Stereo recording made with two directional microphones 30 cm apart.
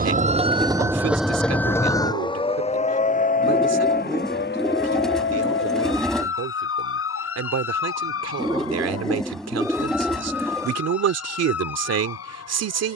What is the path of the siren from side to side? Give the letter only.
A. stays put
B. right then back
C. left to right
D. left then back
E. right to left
E.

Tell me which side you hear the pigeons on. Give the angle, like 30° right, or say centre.
centre.